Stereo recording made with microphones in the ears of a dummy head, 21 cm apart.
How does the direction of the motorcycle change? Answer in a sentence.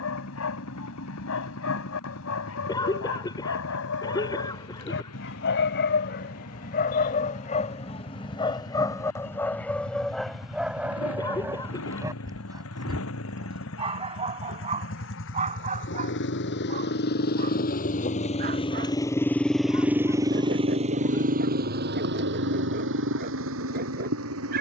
In this clip you hear the motorcycle travel towards the right.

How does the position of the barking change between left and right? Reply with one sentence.
You can hear the barking go from the left side to the right.